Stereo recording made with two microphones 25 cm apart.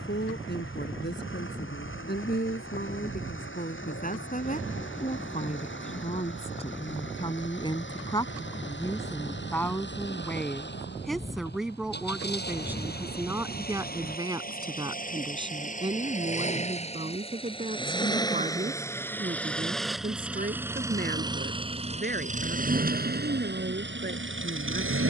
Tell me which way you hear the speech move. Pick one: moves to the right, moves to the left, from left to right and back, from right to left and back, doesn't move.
moves to the right.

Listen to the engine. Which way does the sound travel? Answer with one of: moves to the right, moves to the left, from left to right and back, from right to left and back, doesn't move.
moves to the right.